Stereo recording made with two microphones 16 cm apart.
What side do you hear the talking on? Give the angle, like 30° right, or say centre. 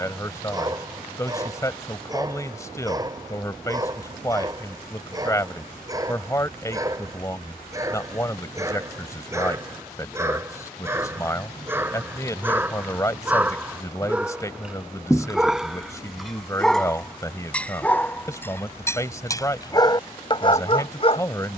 20° left.